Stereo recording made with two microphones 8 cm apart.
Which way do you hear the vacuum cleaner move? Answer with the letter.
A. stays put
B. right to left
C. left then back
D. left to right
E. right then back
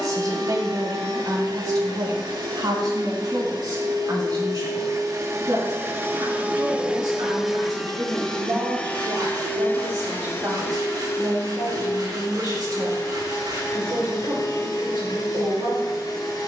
B.